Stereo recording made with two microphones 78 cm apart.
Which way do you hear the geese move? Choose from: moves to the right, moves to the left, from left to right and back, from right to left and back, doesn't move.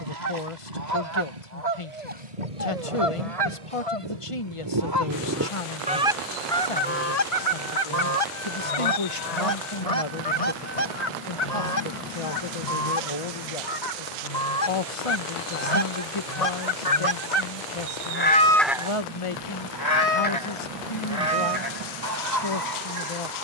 from right to left and back.